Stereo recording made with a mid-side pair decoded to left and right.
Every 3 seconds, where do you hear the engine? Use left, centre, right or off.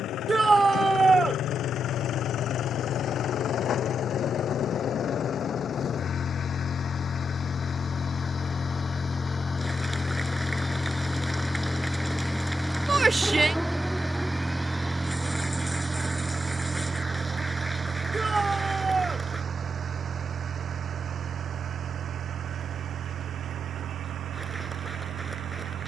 left, left, left, centre, centre, right, right, right, right.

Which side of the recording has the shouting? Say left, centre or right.
right.